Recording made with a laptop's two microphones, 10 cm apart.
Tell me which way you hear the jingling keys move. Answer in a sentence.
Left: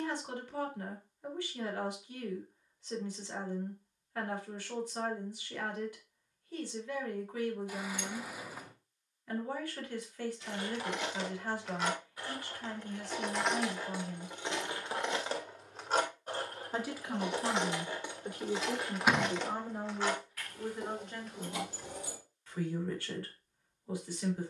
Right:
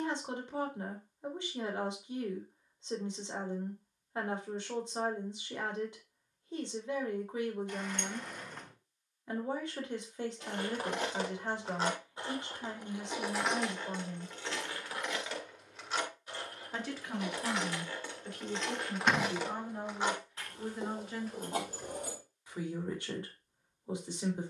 You can hear the jingling keys go left and come back.